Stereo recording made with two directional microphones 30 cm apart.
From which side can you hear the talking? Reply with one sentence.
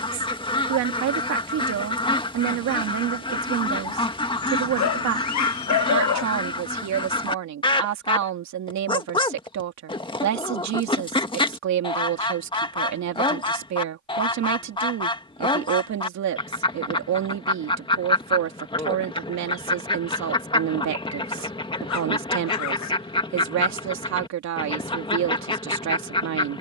You can hear the talking on the right.